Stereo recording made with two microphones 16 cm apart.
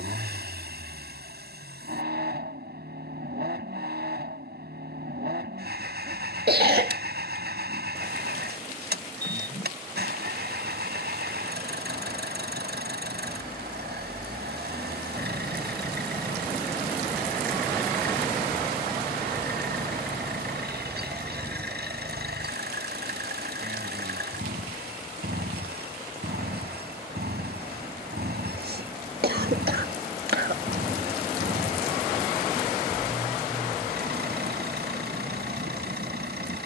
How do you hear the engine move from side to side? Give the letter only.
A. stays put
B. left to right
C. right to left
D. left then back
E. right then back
A.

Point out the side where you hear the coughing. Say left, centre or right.
right.